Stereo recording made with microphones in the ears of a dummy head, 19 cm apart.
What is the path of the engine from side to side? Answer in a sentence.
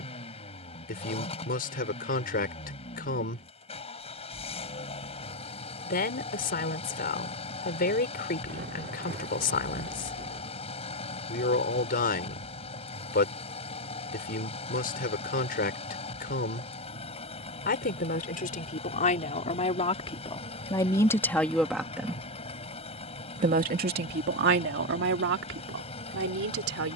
You can hear the engine stay put.